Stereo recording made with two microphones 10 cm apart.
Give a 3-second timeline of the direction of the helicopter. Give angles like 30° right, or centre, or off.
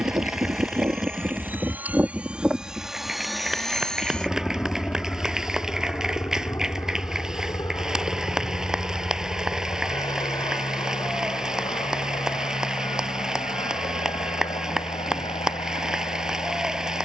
20° right, 10° left, 30° left, 40° left, 50° left, 50° left.